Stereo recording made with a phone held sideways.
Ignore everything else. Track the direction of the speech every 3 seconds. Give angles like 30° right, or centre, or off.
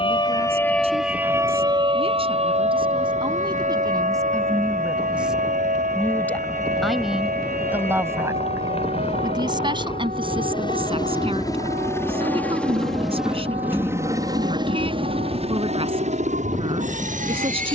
40° right, 20° right, 10° right, 40° right, 40° right, 40° right.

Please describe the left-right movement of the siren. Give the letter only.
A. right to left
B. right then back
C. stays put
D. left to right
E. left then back
D.